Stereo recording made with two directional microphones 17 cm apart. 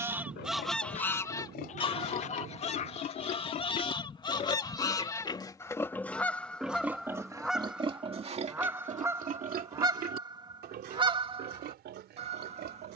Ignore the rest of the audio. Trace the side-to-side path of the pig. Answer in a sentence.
You can hear the pig go from the left side to the right.